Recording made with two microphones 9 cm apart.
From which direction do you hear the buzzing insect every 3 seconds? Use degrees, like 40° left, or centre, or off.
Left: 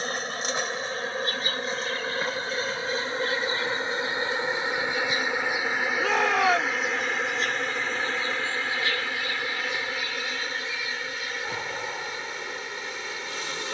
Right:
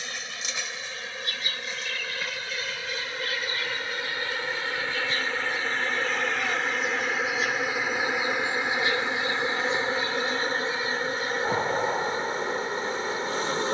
40° left, 20° left, 10° right, 30° right, 40° right.